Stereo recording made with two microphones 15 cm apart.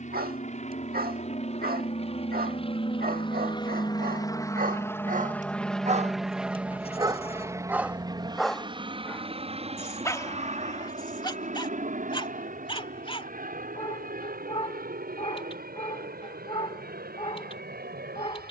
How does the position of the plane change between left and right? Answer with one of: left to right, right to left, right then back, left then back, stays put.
left to right.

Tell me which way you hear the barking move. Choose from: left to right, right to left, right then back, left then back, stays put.
right to left.